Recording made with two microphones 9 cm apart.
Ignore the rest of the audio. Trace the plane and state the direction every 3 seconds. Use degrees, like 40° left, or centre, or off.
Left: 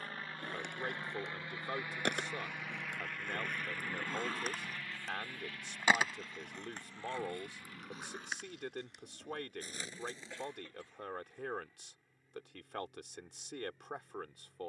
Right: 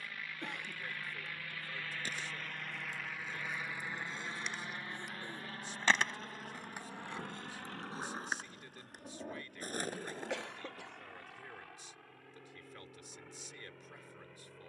20° left, 20° right, 50° right, 60° right, 70° right.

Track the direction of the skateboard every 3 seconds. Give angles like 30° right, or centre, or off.
70° left, 40° left, 20° right, 50° right, off.